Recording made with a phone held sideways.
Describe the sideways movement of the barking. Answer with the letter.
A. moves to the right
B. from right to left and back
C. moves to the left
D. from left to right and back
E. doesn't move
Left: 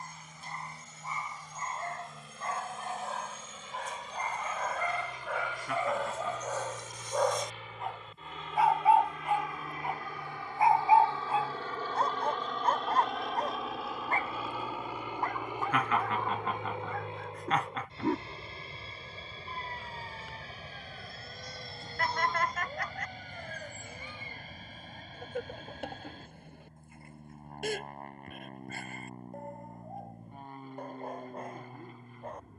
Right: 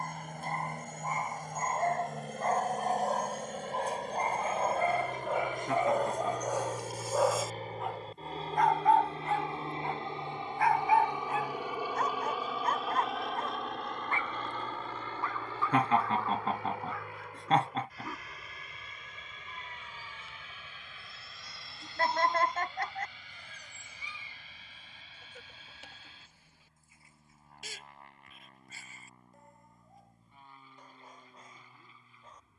C.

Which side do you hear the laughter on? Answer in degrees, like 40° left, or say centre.
30° right.